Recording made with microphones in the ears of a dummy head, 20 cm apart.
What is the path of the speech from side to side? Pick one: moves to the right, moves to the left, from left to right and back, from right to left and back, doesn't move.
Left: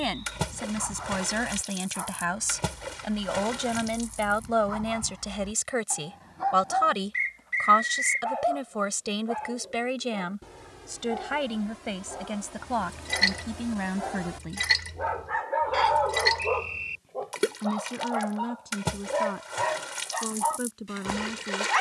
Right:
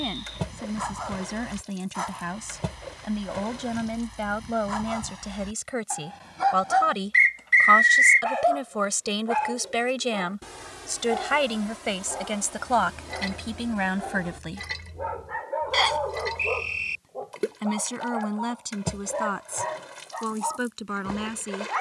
moves to the right.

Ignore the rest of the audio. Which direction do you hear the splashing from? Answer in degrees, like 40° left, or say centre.
60° left.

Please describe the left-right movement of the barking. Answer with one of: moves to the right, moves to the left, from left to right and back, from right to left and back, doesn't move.
moves to the left.